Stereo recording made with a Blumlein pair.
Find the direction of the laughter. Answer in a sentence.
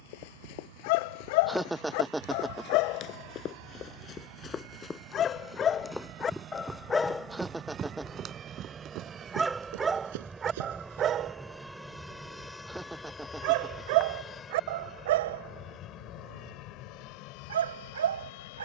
In this clip you hear the laughter in the centre.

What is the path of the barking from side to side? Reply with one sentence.
In this clip you hear the barking move from left to right.